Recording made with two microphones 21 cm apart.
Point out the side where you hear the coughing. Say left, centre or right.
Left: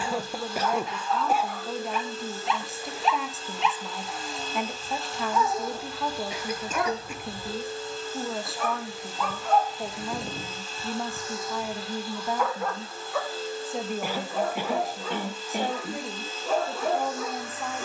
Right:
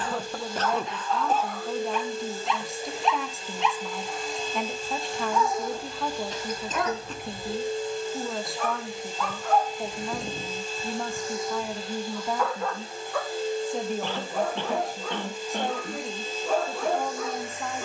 centre.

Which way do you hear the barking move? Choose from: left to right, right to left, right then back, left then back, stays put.
stays put.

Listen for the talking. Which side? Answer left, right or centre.
centre.